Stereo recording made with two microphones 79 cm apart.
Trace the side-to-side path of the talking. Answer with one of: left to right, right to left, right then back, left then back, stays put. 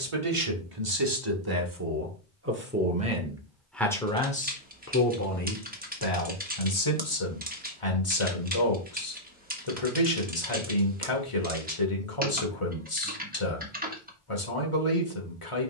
right to left.